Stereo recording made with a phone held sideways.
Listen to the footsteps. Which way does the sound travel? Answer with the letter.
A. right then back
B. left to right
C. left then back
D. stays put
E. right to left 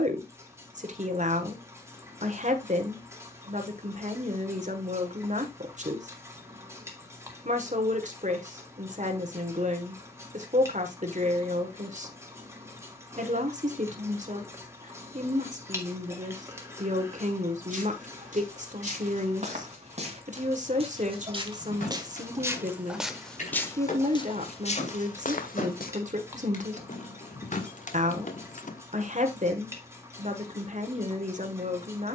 E.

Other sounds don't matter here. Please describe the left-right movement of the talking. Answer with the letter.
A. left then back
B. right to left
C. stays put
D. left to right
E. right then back
C.